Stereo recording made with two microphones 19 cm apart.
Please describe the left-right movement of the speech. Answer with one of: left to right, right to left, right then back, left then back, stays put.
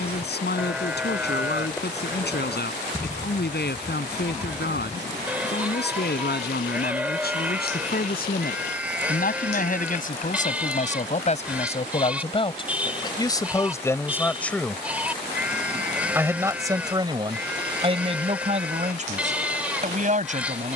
left to right.